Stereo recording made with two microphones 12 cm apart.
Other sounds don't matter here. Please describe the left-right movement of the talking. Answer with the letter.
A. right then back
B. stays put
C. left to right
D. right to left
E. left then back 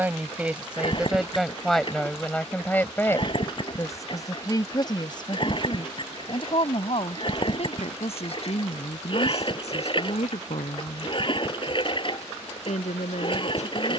D.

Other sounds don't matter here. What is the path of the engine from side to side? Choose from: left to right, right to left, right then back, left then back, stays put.
stays put.